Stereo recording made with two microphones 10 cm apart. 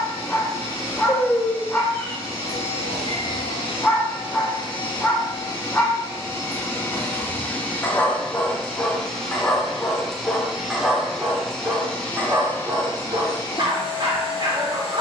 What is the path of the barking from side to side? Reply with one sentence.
In this clip you hear the barking move from left to right.